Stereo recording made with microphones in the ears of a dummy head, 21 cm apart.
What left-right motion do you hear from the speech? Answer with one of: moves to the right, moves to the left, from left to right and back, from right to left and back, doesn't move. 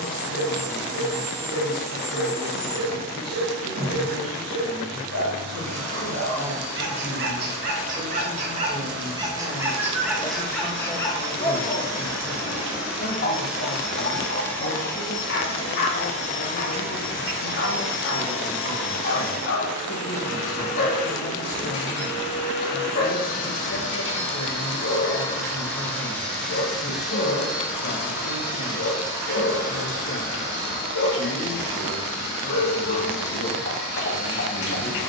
moves to the left.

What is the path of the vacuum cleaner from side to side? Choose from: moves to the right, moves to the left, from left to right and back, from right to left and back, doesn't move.
from right to left and back.